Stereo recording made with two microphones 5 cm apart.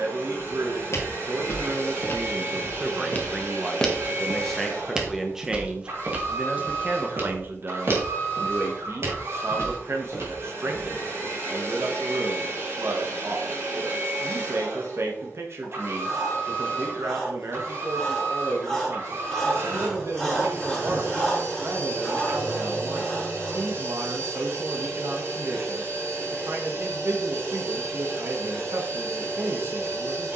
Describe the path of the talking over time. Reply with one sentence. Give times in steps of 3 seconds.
You can hear the talking on the right from 0 s, in the centre from 3 s and on the right from 6 s.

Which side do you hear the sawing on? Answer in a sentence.
You can hear the sawing in the centre.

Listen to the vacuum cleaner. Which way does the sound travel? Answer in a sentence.
You can hear the vacuum cleaner stay put.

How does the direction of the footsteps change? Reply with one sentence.
You can hear the footsteps move from left to right.